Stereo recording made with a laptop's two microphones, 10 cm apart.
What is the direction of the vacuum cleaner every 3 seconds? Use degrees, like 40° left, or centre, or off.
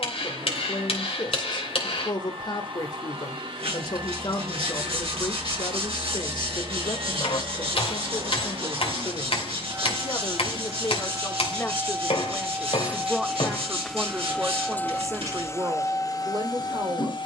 60° right, 60° right, 50° right, 40° right, centre, 40° left.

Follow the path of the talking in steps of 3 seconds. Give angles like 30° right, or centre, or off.
50° left, 50° left, 50° left, 30° left, 10° right, 40° right.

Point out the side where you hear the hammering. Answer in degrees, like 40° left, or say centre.
70° left.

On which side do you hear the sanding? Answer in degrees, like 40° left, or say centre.
70° right.